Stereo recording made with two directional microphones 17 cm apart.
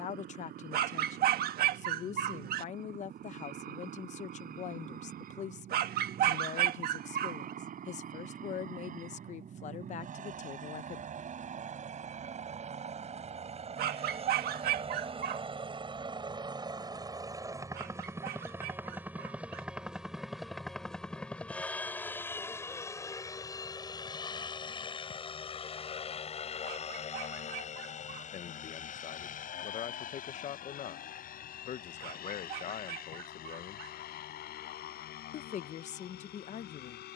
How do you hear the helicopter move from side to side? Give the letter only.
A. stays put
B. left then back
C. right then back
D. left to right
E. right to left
E.